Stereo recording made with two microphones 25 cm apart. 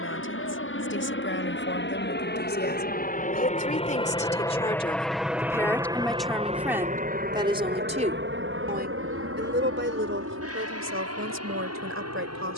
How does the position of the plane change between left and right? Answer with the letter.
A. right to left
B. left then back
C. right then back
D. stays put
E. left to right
E.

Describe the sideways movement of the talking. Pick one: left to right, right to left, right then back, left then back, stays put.
left to right.